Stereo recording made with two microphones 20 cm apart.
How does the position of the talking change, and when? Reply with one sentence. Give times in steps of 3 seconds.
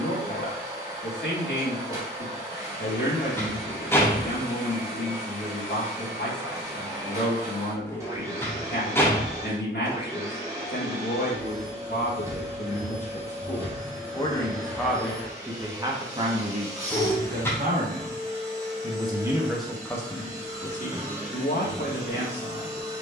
In this clip you hear the talking on the left from 0 s, on the right from 15 s, in the centre from 18 s and on the left from 21 s.